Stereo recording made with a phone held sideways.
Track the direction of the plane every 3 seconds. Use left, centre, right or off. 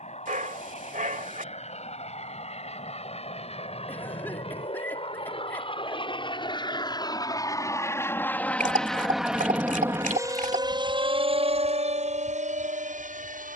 left, left, left, right, right.